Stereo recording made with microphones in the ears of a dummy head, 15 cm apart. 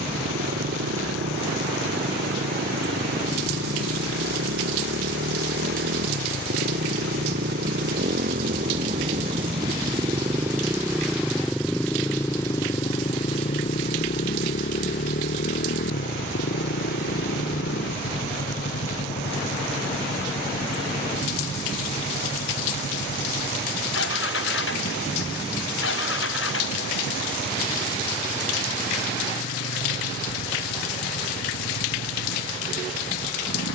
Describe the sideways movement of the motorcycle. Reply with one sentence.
You can hear the motorcycle travel towards the left.